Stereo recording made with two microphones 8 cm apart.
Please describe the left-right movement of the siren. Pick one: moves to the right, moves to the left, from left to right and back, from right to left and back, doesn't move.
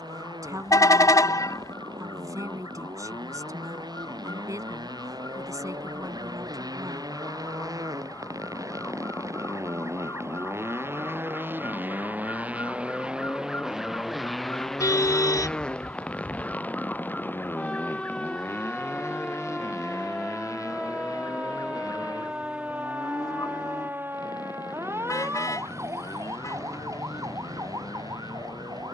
moves to the right.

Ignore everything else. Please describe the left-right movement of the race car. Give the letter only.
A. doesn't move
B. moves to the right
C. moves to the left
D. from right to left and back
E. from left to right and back
C.